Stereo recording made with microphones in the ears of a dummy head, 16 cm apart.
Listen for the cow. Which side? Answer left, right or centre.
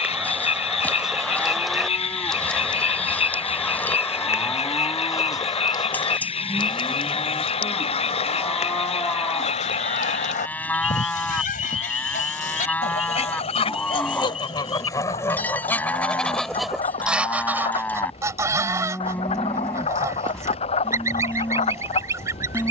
centre.